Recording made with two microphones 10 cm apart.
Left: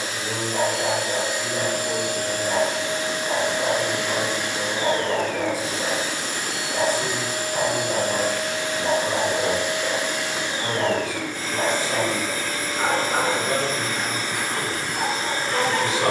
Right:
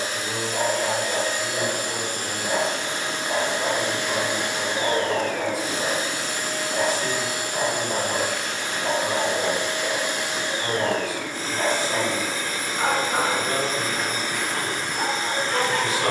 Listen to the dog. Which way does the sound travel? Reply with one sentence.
You can hear the dog stay in one place.